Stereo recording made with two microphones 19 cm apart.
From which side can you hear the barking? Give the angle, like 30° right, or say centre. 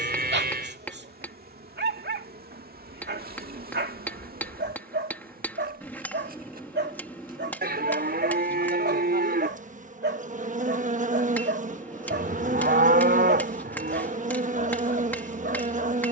70° right.